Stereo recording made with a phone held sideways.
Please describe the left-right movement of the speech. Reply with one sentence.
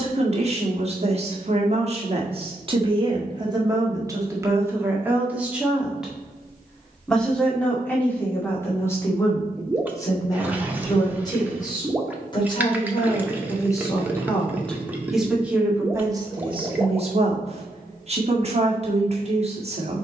You can hear the speech go left and come back.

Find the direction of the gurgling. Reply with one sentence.
In this clip you hear the gurgling in the centre.